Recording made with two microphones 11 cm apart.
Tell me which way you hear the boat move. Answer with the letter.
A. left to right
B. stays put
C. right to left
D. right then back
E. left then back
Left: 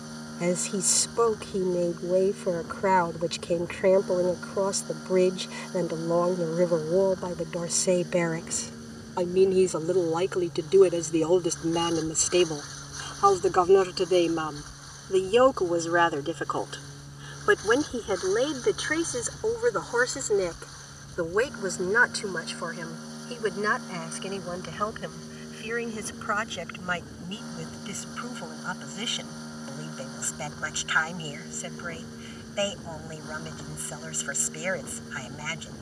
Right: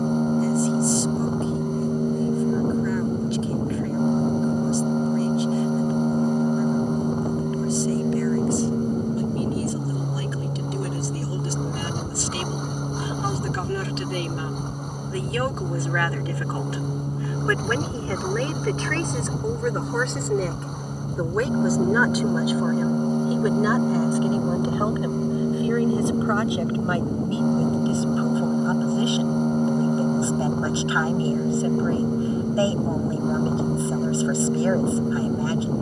B.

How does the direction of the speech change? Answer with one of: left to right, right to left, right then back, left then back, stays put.
left to right.